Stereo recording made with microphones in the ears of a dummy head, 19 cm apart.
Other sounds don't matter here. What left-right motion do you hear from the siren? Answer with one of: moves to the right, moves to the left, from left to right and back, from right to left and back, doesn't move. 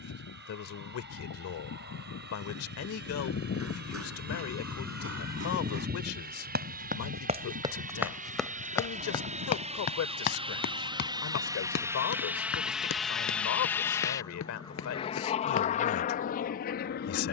moves to the right.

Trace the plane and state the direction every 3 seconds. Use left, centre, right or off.
right, right, right, right, centre, left.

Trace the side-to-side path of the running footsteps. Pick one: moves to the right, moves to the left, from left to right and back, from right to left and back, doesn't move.
moves to the left.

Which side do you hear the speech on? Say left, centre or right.
left.